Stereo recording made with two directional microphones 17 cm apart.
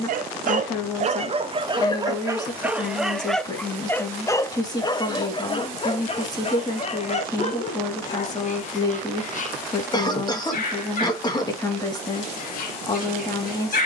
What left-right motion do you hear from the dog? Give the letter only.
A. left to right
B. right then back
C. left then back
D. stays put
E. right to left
E.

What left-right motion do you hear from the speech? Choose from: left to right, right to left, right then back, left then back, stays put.
stays put.